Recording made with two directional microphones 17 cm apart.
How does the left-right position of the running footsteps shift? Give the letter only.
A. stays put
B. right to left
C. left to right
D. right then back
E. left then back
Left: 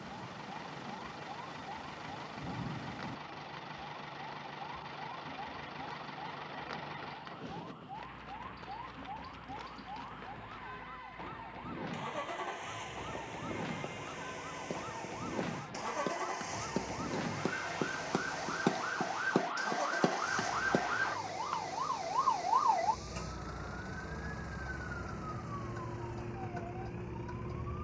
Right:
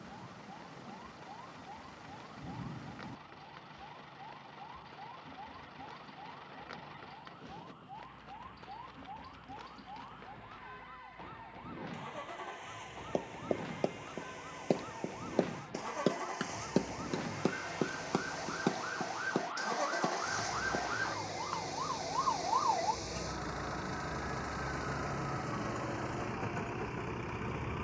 B.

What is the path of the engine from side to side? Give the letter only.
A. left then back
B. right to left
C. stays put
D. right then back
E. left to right
E.